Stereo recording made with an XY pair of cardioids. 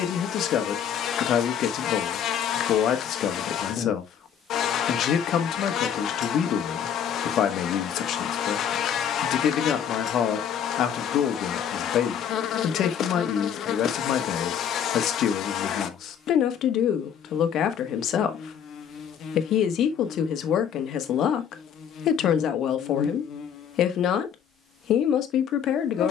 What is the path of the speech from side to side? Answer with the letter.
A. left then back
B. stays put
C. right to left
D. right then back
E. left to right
B.